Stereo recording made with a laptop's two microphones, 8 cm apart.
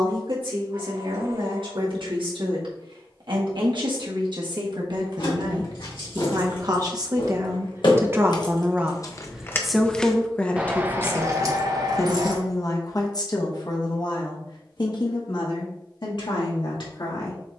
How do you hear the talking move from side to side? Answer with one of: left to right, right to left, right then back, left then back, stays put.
right to left.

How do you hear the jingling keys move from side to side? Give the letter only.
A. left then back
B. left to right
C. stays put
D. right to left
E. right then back
B.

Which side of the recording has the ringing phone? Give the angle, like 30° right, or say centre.
60° right.